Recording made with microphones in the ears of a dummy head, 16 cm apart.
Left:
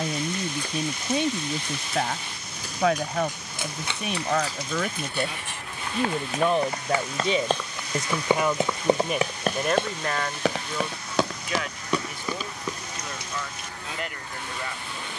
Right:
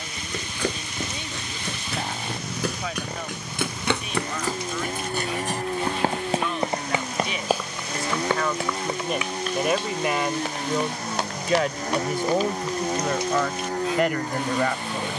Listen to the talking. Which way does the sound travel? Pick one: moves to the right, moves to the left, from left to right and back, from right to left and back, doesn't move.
moves to the right.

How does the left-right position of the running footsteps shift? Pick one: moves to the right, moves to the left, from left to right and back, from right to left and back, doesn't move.
moves to the left.